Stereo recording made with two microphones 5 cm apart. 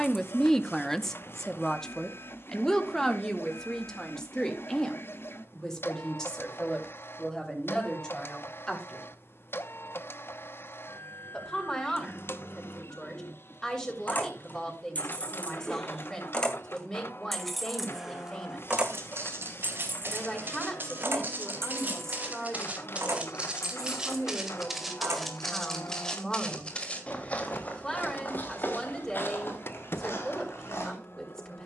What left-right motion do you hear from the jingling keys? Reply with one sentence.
In this clip you hear the jingling keys go from the left side to the right.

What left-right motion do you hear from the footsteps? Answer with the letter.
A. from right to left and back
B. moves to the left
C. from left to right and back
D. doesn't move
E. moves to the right
B.